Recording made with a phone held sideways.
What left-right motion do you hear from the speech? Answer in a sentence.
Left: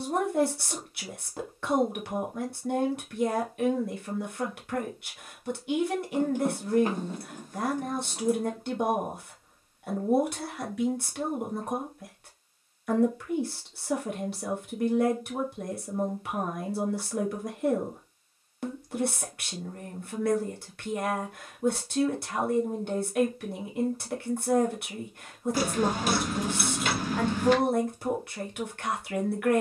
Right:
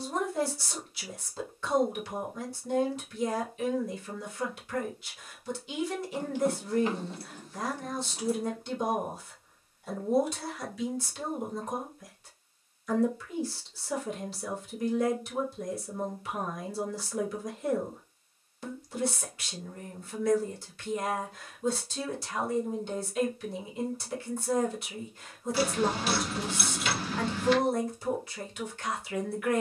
In this clip you hear the speech stay put.